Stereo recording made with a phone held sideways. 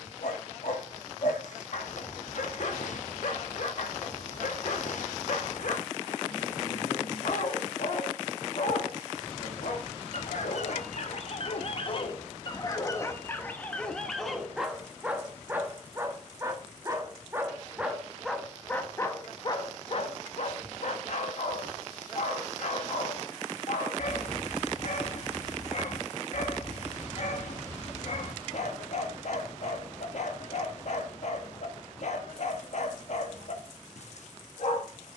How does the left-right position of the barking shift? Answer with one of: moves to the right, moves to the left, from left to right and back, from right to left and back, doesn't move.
from left to right and back.